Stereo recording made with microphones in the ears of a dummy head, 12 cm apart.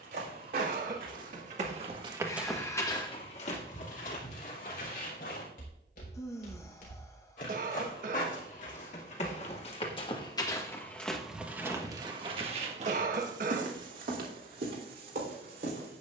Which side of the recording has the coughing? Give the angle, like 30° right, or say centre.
60° right.